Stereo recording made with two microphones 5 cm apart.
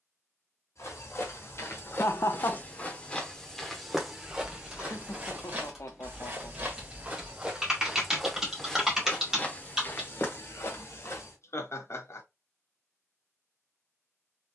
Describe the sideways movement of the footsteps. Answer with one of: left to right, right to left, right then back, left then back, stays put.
right then back.